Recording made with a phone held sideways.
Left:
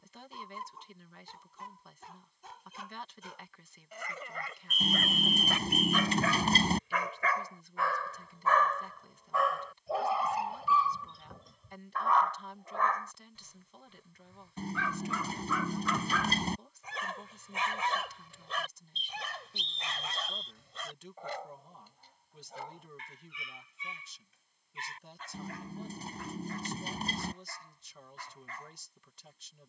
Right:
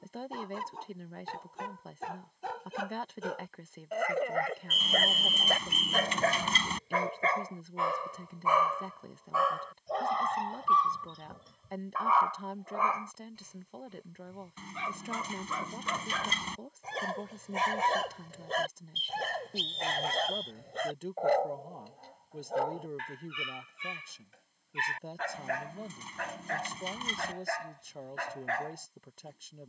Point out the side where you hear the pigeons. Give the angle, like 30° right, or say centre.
40° left.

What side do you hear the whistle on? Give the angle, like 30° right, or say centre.
centre.